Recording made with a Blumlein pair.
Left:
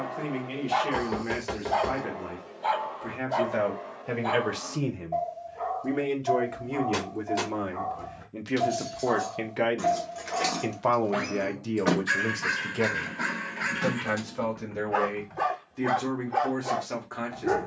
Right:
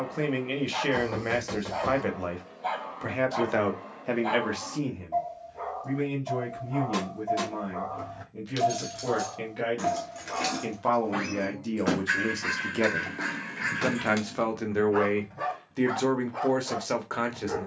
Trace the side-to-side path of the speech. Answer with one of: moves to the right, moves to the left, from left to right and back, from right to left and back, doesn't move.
from right to left and back.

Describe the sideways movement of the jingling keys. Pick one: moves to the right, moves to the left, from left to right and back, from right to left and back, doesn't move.
from right to left and back.